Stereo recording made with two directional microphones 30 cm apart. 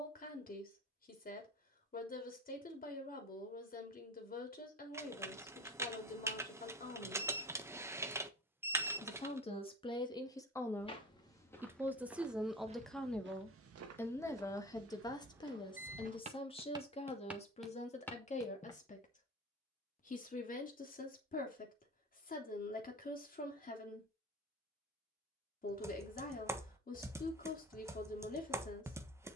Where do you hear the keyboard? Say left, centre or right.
centre.